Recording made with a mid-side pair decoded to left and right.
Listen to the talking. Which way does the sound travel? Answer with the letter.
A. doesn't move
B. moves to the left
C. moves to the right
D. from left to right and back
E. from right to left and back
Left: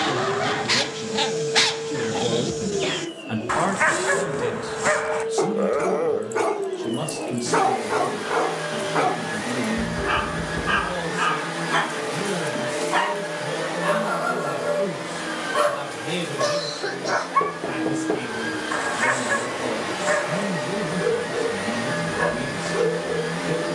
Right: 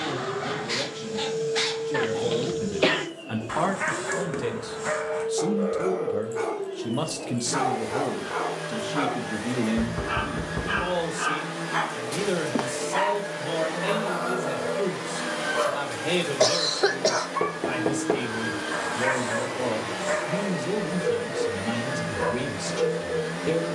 C.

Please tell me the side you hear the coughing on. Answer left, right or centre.
right.